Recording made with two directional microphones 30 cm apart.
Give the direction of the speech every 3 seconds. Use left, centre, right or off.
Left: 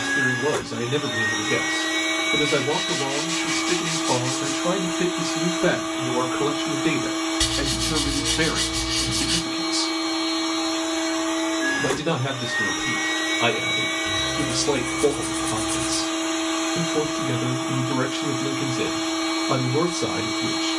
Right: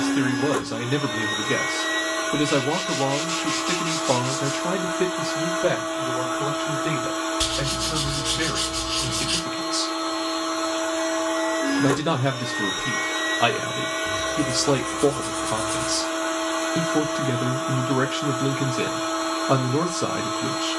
right, centre, left, centre, right, right, right.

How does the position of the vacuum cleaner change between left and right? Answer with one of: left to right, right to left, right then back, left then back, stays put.
stays put.